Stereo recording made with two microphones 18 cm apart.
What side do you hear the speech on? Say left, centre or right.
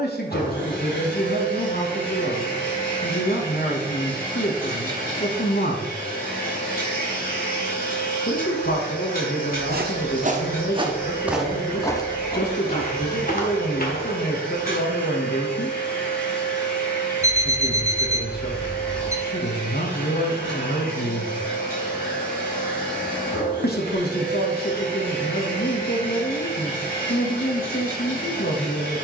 left.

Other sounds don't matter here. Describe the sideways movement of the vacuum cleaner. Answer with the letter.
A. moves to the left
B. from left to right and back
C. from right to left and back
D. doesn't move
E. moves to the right
D.